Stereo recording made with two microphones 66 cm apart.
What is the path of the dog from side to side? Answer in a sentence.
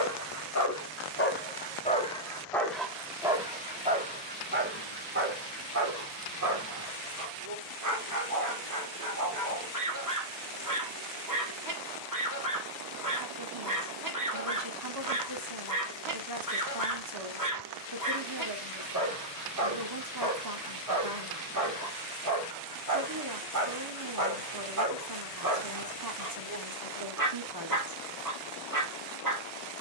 In this clip you hear the dog move from left to right.